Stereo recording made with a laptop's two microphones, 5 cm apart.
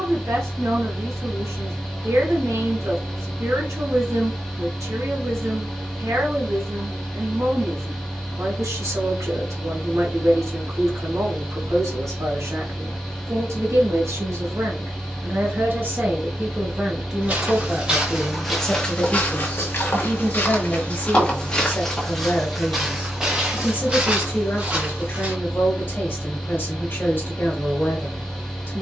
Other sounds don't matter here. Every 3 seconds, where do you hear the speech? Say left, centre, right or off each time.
right, right, right, right, right, right, left, left, left, left.